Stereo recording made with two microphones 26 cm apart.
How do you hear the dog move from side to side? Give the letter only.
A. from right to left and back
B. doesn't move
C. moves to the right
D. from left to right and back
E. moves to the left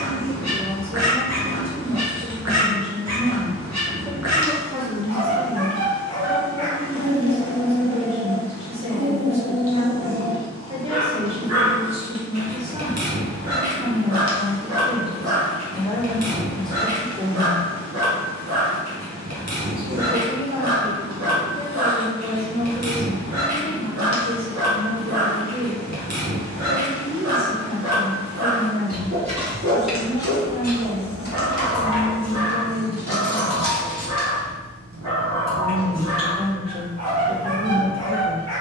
B.